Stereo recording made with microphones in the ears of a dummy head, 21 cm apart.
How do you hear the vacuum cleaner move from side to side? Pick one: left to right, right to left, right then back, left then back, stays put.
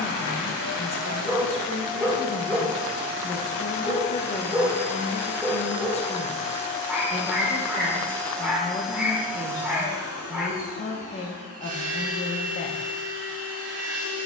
left to right.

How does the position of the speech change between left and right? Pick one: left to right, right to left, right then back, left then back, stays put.
stays put.